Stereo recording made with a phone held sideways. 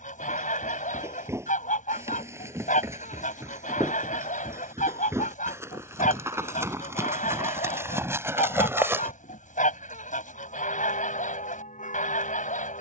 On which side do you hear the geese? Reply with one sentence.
You can hear the geese on the left.